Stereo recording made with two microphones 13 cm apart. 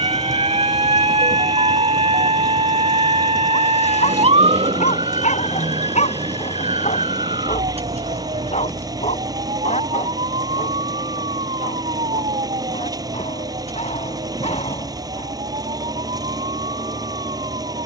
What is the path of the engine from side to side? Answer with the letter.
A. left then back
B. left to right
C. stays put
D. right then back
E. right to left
C.